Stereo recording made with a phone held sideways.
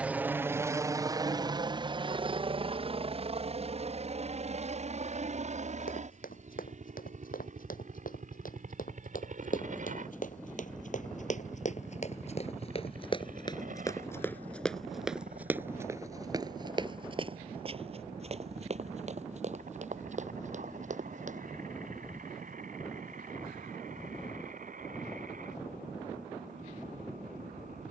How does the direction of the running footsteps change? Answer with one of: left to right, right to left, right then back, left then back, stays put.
left to right.